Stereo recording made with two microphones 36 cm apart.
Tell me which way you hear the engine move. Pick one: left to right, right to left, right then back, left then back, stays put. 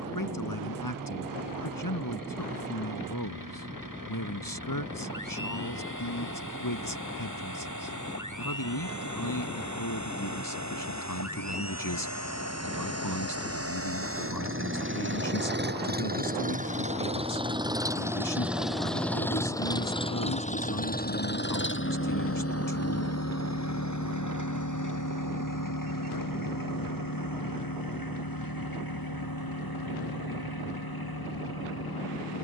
right to left.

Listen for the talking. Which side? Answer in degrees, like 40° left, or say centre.
70° left.